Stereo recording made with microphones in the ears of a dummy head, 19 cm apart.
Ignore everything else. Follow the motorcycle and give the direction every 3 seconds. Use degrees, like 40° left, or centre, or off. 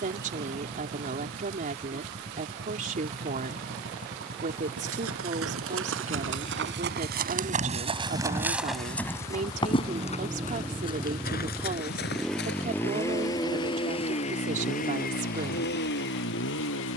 50° right, 40° right, 40° right, 20° right, 20° left, 50° left.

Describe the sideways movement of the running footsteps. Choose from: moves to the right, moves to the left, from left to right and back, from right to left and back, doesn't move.
moves to the left.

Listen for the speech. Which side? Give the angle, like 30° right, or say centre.
40° right.